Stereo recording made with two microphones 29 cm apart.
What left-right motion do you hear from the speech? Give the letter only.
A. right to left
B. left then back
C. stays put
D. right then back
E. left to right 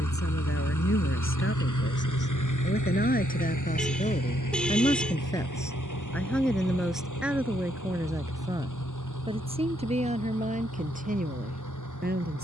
E.